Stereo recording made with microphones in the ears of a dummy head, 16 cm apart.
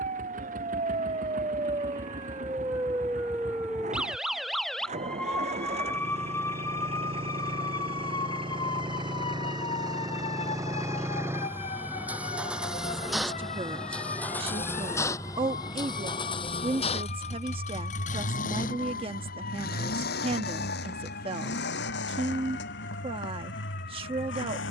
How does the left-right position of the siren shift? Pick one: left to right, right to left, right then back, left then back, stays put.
right to left.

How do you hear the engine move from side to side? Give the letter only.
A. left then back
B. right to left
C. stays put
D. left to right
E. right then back
B.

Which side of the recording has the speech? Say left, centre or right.
right.